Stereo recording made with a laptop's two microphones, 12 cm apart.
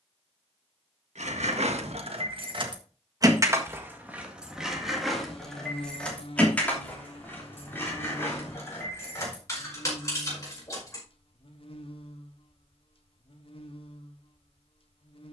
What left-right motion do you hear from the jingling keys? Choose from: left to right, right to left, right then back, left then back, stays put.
right to left.